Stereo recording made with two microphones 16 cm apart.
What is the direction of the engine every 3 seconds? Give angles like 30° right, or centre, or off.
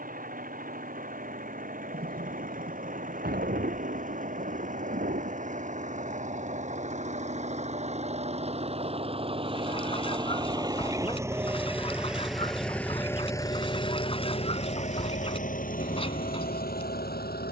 60° right, 50° right, 40° right, 20° right, 20° left, 60° left.